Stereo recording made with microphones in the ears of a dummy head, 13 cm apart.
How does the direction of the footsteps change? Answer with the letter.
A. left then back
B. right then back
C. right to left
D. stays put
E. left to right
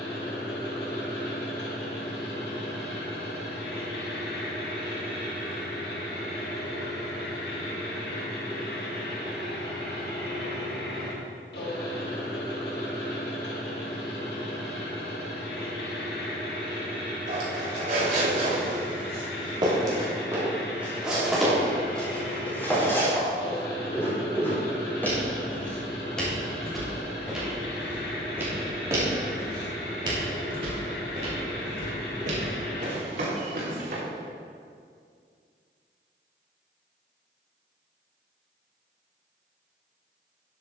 A.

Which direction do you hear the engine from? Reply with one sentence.
In this clip you hear the engine on the left.